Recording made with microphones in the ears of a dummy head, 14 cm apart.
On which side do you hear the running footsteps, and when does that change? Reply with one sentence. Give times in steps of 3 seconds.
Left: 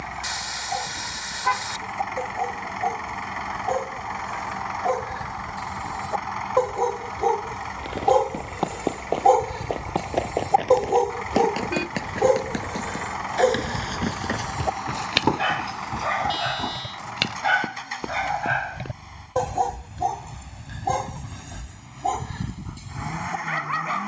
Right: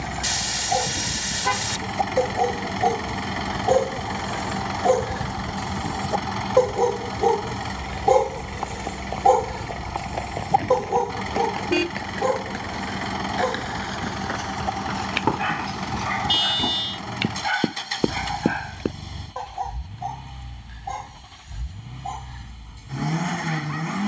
You can hear the running footsteps not at all from 0 s, on the left from 6 s, in the centre from 15 s, on the right from 18 s and not at all from 21 s.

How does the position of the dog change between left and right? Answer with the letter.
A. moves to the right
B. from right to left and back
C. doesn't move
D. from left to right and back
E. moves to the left
E.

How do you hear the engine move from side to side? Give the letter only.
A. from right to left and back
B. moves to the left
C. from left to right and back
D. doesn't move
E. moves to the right
D.